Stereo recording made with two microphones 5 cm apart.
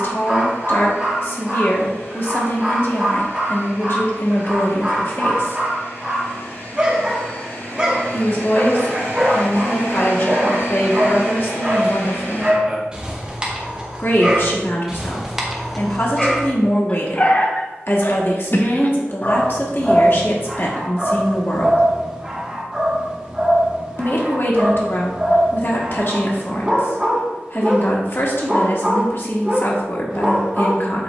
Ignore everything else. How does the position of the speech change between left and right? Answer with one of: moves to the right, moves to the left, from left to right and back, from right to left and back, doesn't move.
doesn't move.